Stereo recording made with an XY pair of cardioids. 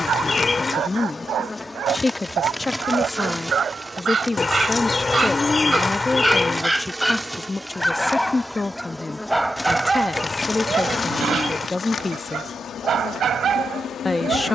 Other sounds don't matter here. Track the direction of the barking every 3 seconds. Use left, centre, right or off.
right, right, centre, right, right.